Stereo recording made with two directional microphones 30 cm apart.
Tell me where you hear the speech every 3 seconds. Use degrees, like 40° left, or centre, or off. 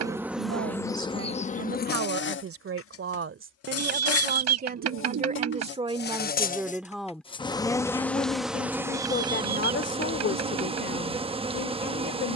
50° right, 30° right, centre, 40° left.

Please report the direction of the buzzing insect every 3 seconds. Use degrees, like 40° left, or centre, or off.
20° left, 50° left, 10° left, 20° right.